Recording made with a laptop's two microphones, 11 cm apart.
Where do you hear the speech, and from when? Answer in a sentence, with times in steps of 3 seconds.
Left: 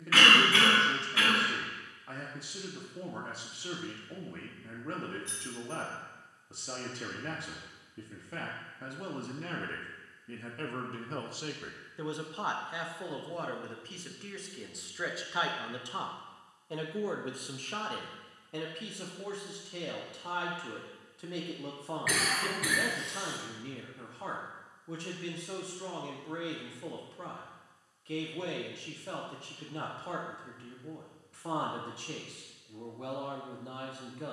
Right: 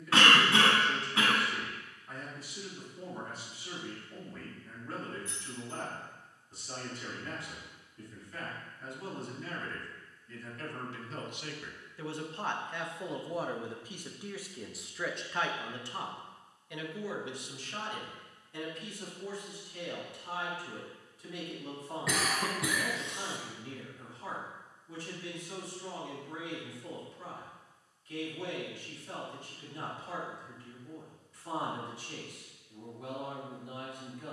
In this clip you hear the speech on the left from 0 s, in the centre from 12 s and on the left from 15 s.